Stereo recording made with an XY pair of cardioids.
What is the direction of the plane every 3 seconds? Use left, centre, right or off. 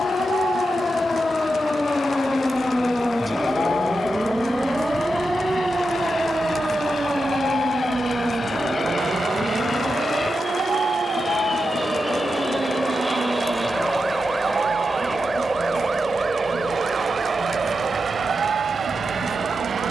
left, left, left, left, centre, right, right.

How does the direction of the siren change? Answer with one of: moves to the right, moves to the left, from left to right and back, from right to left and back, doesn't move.
moves to the right.